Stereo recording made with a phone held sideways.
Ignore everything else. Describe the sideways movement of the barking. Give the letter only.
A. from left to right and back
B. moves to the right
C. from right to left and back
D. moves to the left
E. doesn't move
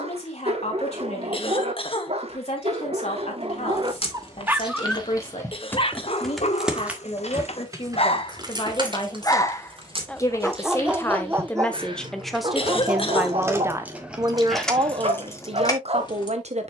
C.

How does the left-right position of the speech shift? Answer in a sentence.
In this clip you hear the speech move to the right.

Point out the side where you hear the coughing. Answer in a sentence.
In this clip you hear the coughing on the left.